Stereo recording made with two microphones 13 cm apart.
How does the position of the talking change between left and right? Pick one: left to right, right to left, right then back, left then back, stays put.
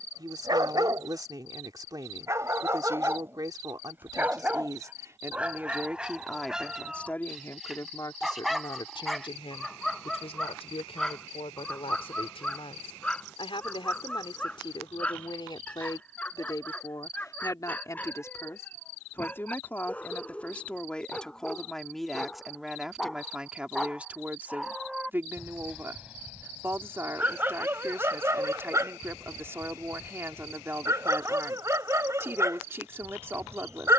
left then back.